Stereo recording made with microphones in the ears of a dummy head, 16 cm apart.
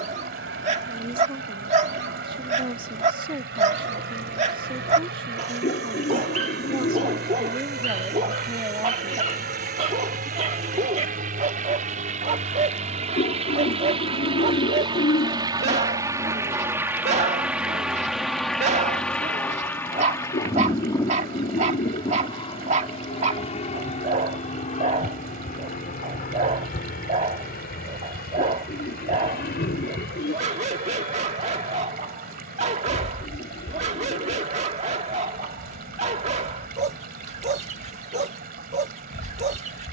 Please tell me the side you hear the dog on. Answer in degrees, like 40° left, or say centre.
40° right.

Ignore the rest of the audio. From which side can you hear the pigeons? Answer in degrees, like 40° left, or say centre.
50° left.